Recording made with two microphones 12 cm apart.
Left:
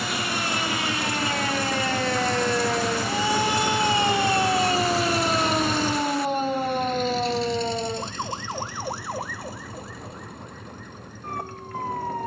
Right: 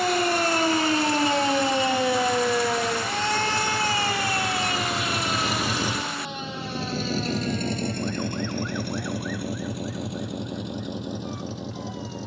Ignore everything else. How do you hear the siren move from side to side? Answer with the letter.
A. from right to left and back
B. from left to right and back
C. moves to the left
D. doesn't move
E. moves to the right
C.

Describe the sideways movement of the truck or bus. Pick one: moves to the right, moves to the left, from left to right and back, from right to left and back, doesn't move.
moves to the right.